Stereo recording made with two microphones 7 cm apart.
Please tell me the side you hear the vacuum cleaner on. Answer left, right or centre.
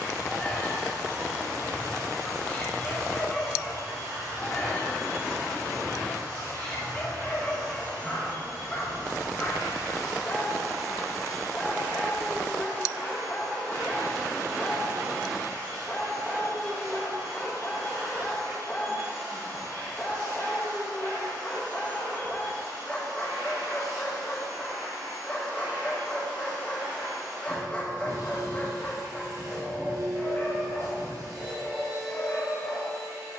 right.